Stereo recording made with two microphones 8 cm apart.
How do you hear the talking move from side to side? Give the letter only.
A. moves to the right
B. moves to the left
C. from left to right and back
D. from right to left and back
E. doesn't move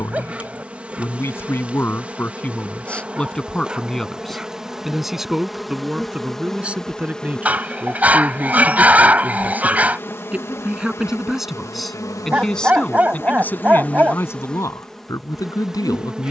C.